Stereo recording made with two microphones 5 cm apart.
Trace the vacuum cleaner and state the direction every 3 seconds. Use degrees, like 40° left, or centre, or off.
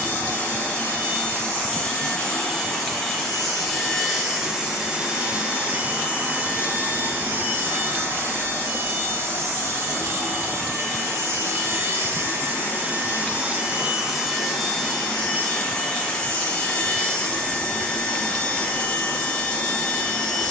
20° left, 10° right, 40° right, 60° right, 20° right, 20° left, 20° left.